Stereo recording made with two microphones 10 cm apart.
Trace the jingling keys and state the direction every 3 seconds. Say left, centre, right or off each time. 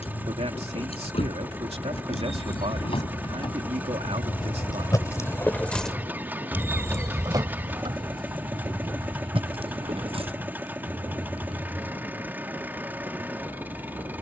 left, left, right, right, off.